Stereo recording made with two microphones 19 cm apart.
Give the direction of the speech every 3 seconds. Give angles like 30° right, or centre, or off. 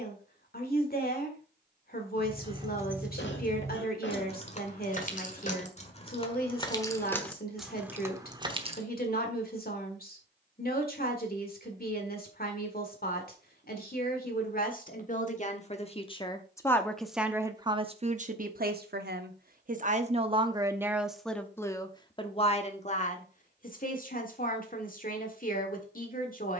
50° left, 50° left, 50° left, 50° left, 50° left, 10° left, 40° right, 30° left, 50° left.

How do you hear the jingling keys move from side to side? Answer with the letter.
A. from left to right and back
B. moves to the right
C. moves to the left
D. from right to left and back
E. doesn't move
D.